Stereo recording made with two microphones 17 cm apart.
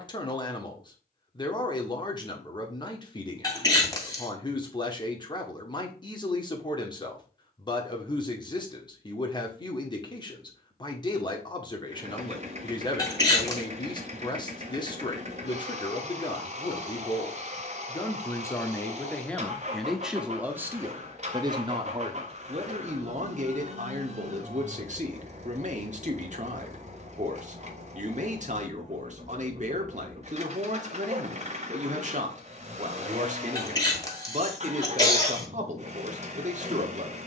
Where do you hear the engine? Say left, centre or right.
right.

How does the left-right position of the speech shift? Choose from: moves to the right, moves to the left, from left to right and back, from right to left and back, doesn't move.
moves to the right.